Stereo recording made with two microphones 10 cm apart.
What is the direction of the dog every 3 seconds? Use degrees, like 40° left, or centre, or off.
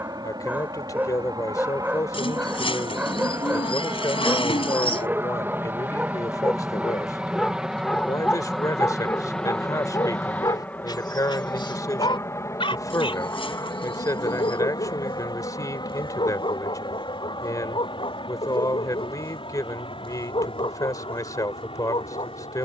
20° right, 20° right, 10° left, 40° left, 60° left, 70° left, 70° left, 70° left.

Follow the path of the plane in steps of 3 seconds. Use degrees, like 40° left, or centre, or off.
40° right, 30° right, 10° right, 10° left, 30° left, 50° left, 60° left, 60° left.